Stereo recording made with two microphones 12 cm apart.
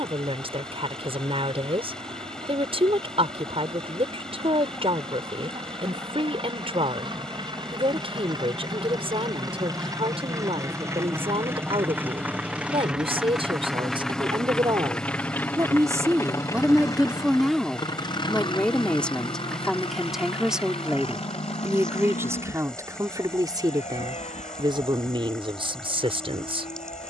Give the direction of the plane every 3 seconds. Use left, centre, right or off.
right, right, right, right, centre, left, left, left, left.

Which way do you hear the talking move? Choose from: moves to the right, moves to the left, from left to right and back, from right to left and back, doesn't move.
from right to left and back.